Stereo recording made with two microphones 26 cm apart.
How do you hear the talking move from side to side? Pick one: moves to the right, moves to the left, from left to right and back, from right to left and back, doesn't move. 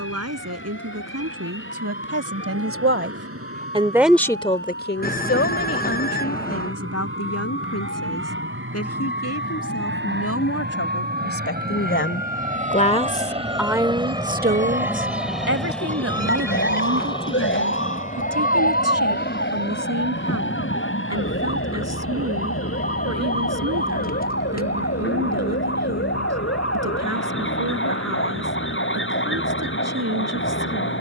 from right to left and back.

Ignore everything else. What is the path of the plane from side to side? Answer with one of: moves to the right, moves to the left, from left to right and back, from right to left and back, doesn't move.
moves to the left.